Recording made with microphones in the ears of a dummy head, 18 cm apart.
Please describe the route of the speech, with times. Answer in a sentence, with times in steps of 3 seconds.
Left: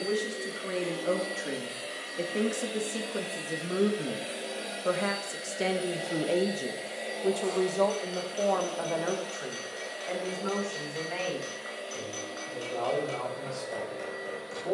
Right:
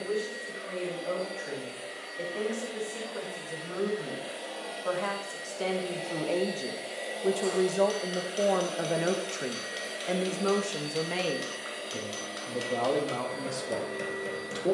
You can hear the speech on the left from 0 s, in the centre from 6 s and on the right from 9 s.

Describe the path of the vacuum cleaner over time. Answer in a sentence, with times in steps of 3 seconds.
You can hear the vacuum cleaner on the left from 0 s, in the centre from 6 s and on the right from 9 s.